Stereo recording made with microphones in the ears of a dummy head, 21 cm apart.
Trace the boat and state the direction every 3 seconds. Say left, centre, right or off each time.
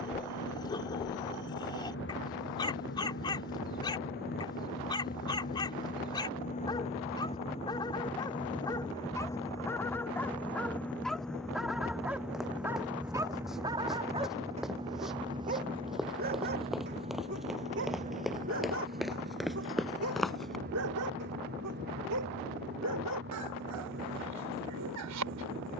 left, left, left, centre, centre, right, right, right, right.